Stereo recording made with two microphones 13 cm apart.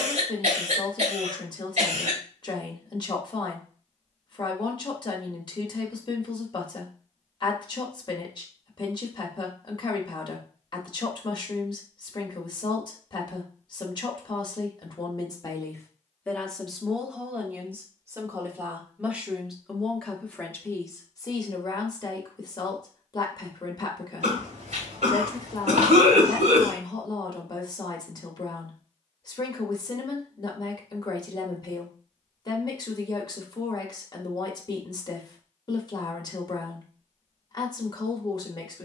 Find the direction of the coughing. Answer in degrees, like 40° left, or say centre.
70° right.